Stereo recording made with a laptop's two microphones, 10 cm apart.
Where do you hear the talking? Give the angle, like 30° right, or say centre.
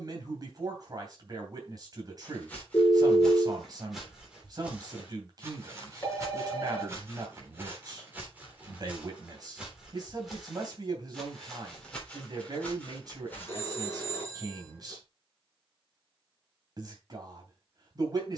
40° right.